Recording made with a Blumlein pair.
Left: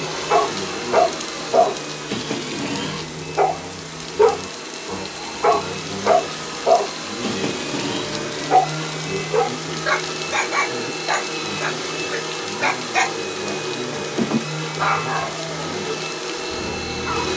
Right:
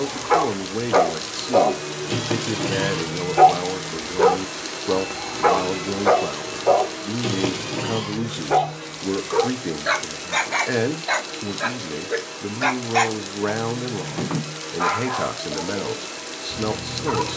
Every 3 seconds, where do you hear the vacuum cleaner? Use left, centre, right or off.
left, centre, left, left, left, left.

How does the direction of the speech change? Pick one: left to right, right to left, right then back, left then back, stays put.
stays put.